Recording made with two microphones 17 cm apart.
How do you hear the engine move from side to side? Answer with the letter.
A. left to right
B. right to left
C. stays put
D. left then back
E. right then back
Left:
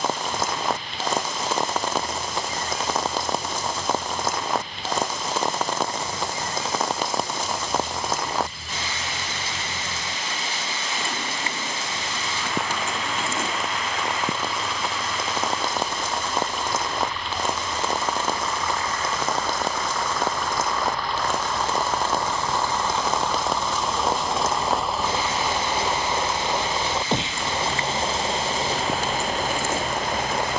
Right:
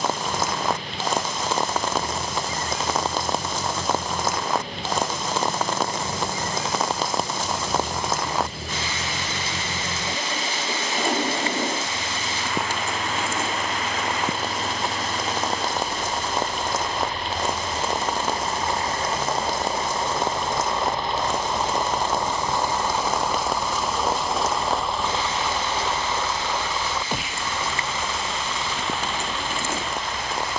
B.